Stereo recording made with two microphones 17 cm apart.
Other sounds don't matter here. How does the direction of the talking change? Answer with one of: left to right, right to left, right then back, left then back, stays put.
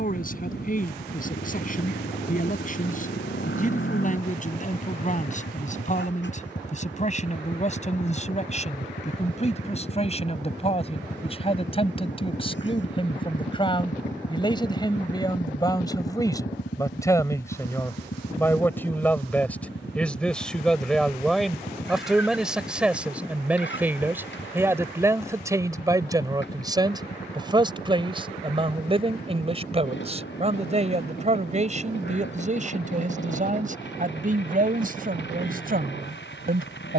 left to right.